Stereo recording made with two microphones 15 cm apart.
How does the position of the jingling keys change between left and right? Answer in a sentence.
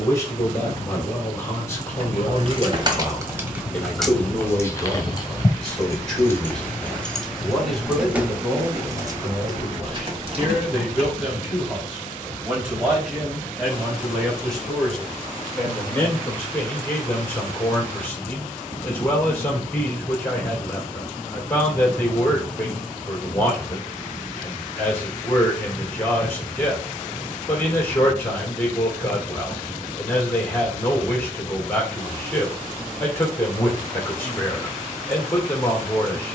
You can hear the jingling keys go left and come back.